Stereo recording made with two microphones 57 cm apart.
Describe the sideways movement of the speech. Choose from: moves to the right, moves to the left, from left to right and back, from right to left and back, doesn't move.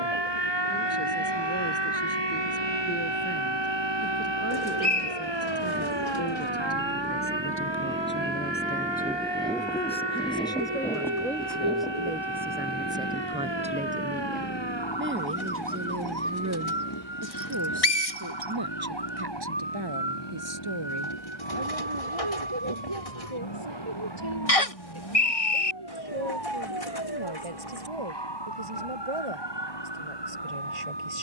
moves to the right.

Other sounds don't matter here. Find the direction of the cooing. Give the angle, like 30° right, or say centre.
80° left.